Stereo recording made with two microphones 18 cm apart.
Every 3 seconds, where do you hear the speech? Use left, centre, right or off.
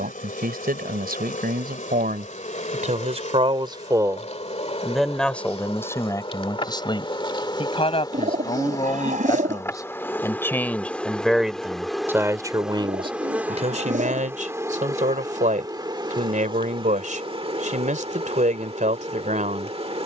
right, centre, left, centre, right, right, right.